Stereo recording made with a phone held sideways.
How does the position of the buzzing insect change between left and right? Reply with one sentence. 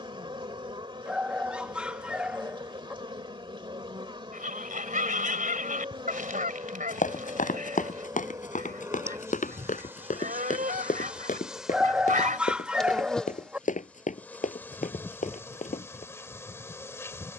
In this clip you hear the buzzing insect travel towards the left.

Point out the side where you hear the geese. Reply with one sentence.
In this clip you hear the geese on the right.